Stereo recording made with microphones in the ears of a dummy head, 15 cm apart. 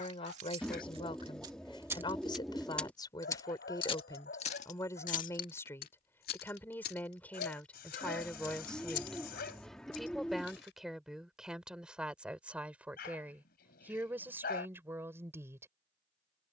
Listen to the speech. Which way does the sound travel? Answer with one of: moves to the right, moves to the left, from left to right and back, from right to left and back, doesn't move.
moves to the right.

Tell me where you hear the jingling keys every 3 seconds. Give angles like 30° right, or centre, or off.
30° right, 40° left, 60° left, 70° left, off, off.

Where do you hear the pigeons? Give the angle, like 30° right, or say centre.
centre.